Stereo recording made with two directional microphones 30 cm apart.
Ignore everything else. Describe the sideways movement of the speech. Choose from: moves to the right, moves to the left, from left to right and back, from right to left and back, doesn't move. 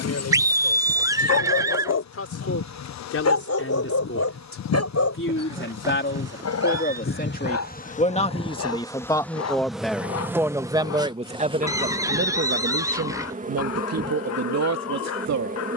moves to the right.